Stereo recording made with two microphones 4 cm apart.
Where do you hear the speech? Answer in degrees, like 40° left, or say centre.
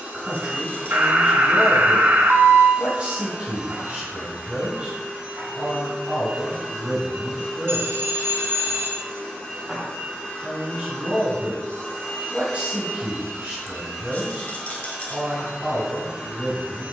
20° right.